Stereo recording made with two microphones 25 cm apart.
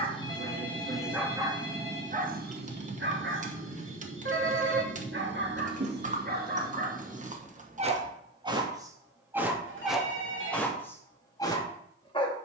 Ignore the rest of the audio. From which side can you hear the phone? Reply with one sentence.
You can hear the phone on the right.